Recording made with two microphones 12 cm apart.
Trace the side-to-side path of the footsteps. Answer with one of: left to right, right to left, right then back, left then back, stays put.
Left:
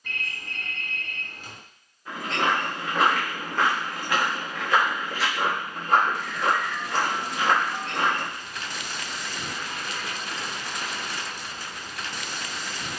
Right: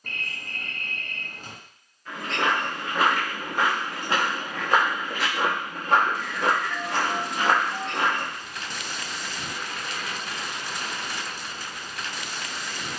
right then back.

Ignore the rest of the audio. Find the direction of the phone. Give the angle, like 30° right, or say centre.
40° right.